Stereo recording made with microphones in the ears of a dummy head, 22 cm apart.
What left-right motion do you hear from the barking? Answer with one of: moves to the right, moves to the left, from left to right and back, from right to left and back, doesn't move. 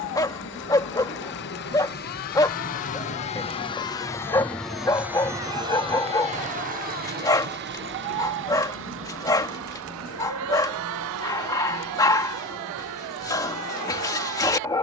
doesn't move.